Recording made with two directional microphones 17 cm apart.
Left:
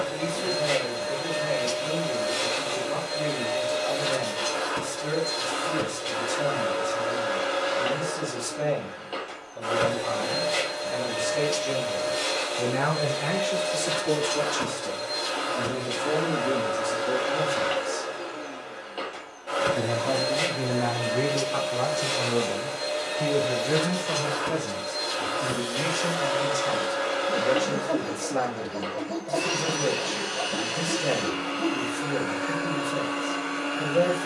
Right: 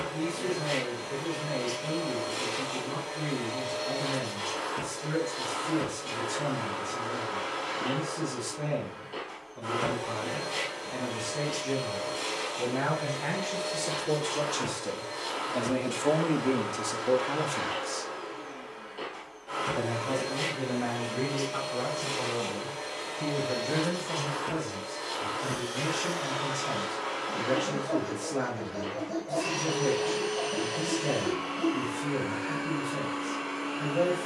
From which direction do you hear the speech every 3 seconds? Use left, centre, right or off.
left, left, left, left, left, right, left, left, left, left, left, left.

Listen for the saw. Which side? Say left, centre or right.
left.